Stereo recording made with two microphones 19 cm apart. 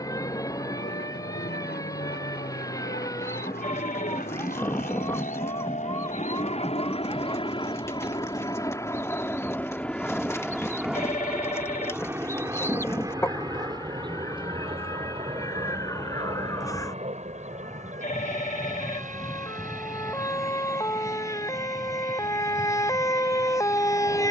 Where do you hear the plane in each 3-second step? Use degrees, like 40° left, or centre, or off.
70° left, 50° left, 30° left, centre, 20° right, 30° right, 40° right, 50° right.